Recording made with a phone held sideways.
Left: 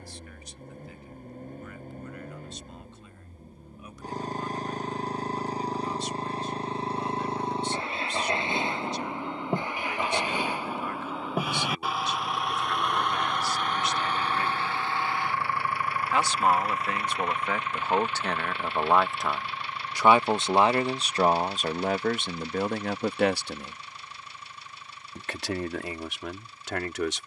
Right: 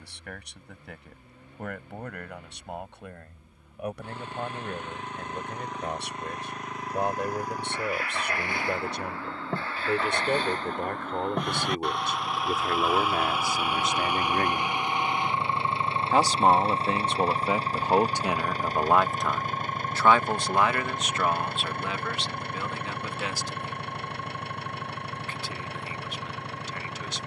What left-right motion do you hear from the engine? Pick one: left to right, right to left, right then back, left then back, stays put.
left to right.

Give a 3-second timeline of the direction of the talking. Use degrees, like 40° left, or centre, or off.
70° right, 60° right, 60° right, 60° right, 50° right, 30° right, 10° left, 50° left, 70° left.